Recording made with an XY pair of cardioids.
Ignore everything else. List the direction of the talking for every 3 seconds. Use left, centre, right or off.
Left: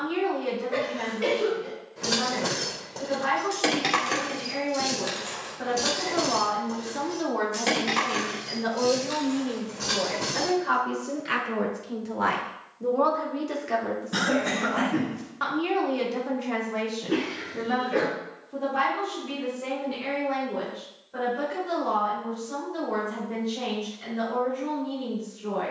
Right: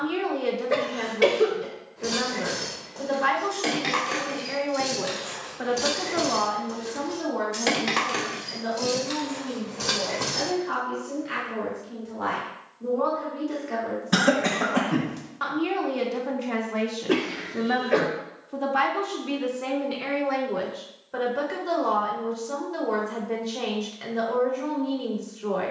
right, right, left, left, left, centre, right, right, right.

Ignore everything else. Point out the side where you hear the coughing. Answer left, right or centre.
right.